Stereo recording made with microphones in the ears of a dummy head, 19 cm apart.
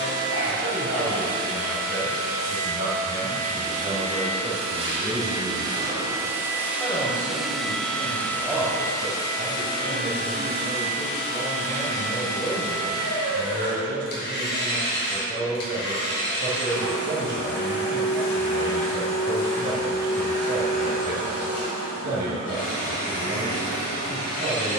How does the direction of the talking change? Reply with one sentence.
In this clip you hear the talking go left and come back.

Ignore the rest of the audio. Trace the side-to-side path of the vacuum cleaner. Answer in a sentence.
You can hear the vacuum cleaner go from the right side to the left.